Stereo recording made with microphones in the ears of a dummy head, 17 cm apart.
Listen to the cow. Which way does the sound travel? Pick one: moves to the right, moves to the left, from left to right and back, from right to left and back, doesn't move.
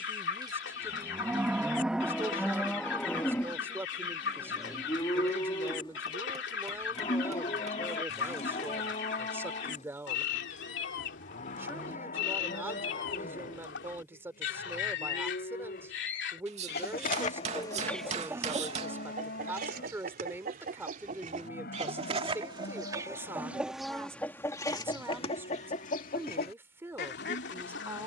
moves to the left.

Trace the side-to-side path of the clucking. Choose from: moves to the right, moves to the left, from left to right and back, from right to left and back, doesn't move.
from left to right and back.